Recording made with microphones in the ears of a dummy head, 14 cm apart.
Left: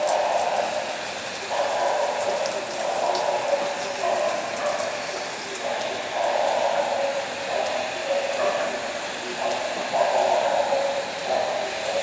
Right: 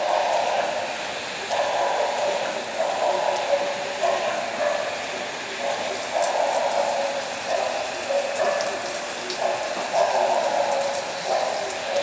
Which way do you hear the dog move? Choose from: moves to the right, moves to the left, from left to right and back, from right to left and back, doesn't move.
from left to right and back.